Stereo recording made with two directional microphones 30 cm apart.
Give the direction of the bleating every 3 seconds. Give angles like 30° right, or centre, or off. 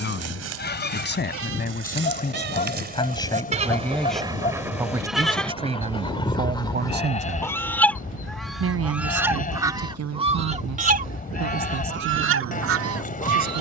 40° right, 10° right, 30° left, 30° left, 30° left.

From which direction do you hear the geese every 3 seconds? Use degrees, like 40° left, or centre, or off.
30° left, 20° left, 10° left, 20° right, 50° right.